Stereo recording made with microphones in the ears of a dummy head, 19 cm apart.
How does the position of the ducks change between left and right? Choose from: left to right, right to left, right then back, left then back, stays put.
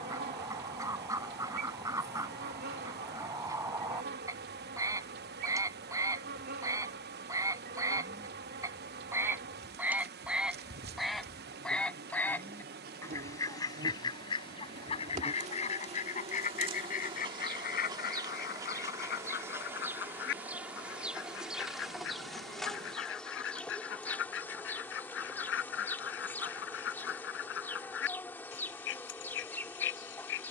right to left.